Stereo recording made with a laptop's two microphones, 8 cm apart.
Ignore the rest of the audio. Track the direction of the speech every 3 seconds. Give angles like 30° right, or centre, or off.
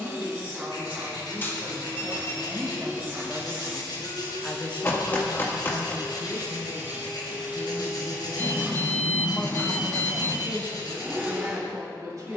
40° right, 20° left, 70° left, 30° right.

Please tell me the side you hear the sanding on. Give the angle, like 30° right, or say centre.
70° left.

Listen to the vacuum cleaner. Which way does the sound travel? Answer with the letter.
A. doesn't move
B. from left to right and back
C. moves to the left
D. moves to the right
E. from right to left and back
A.